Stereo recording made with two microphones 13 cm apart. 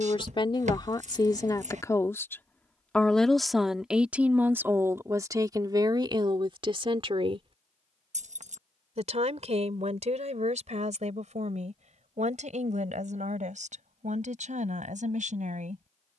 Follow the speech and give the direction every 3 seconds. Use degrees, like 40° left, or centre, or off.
30° left, 10° right, 40° right, 60° right, 70° right, 70° right.